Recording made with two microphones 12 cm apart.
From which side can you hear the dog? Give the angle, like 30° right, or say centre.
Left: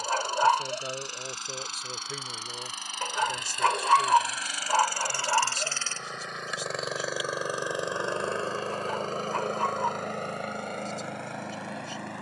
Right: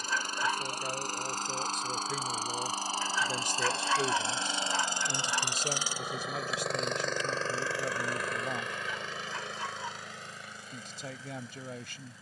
50° left.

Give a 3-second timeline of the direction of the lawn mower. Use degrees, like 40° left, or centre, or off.
40° right, 30° right, 10° left, 60° left.